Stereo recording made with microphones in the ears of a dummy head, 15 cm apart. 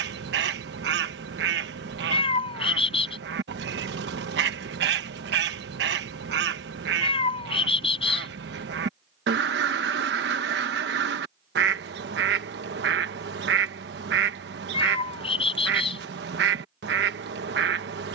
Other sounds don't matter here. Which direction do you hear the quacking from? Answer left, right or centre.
right.